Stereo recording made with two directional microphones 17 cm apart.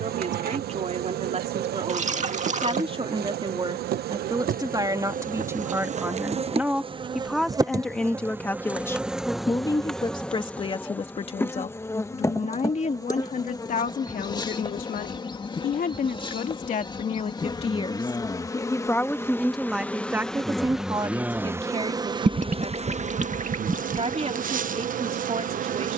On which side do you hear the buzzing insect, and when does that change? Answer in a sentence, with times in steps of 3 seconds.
In this clip you hear the buzzing insect on the right from 0 s, in the centre from 9 s, on the left from 12 s, in the centre from 18 s and on the right from 21 s.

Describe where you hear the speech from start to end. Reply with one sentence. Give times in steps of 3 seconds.
You can hear the speech on the right from 0 s, in the centre from 6 s, on the left from 9 s, in the centre from 18 s and on the right from 21 s.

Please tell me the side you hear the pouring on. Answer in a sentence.
In this clip you hear the pouring on the right.